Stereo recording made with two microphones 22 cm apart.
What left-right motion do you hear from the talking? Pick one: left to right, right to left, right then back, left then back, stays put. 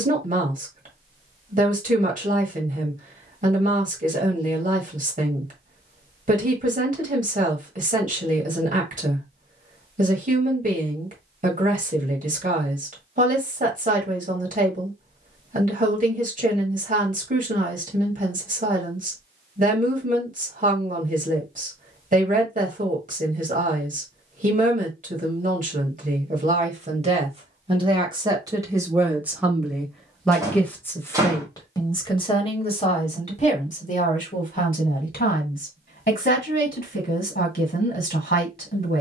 right to left.